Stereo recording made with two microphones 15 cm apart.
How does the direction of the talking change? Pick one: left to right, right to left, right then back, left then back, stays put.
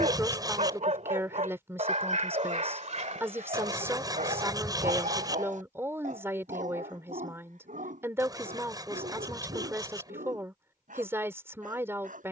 stays put.